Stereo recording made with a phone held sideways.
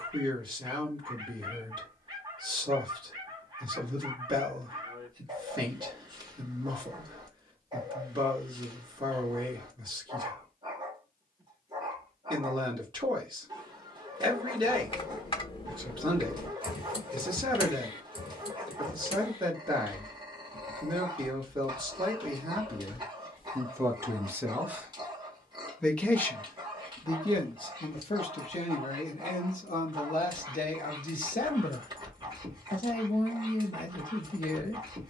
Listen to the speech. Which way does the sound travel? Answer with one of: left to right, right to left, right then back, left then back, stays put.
right to left.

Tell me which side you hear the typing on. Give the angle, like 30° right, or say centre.
40° left.